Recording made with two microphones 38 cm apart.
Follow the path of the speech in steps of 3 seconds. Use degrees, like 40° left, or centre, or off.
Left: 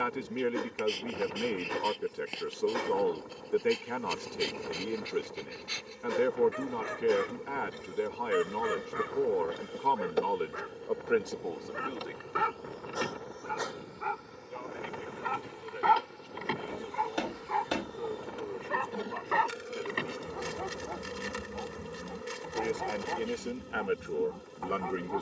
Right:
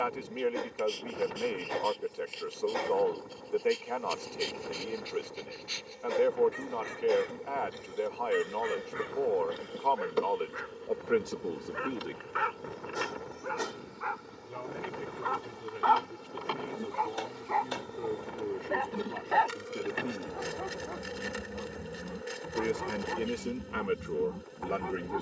30° left, 30° left, 30° left, 10° left, 60° right, 60° right, 50° right, 20° right, centre.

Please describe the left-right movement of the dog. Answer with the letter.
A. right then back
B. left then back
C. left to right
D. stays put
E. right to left
C.